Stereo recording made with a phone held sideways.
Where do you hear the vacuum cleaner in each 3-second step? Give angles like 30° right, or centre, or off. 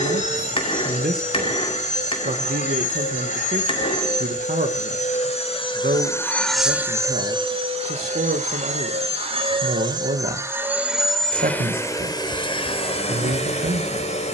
50° left, 50° left, 30° right, 10° right, 40° left.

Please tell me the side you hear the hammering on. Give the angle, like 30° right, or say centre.
30° left.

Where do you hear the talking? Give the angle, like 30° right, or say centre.
70° right.